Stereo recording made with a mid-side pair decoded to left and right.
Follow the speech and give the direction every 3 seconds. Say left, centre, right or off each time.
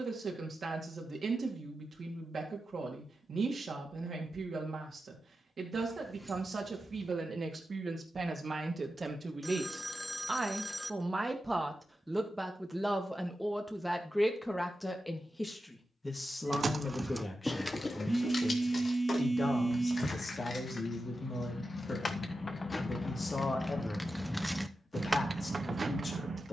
right, right, right, right, centre, left, left, left, left.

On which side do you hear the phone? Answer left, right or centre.
centre.